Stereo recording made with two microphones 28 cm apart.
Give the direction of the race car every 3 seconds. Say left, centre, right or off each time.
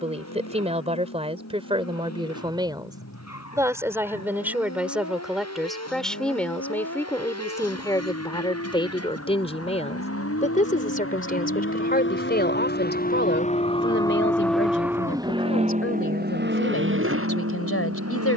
left, left, left, left, left, right.